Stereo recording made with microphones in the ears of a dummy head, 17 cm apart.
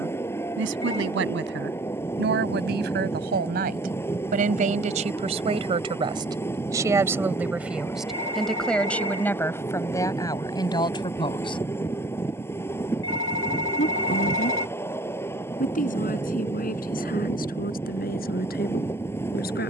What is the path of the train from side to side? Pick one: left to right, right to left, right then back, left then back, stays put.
stays put.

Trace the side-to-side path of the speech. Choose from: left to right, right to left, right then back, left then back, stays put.
right to left.